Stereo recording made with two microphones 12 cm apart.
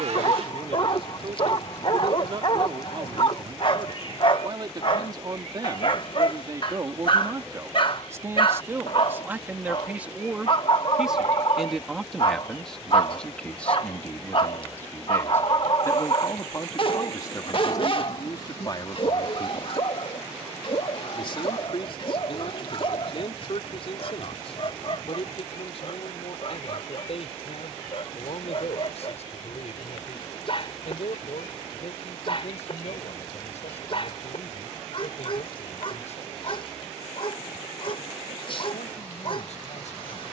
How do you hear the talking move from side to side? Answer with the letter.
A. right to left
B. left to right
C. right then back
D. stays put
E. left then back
A.